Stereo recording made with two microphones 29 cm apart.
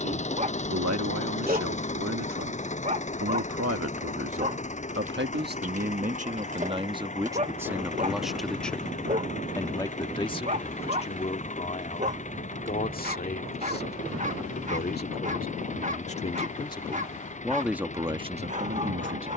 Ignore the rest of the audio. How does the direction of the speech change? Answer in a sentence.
In this clip you hear the speech go left and come back.